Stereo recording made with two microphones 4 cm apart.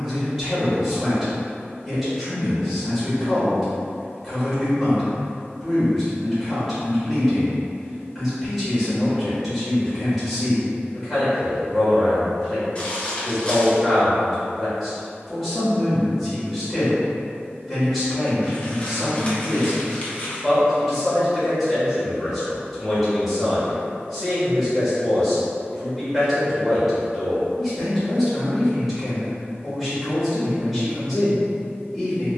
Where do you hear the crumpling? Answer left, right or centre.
left.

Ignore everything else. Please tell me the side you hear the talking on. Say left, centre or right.
centre.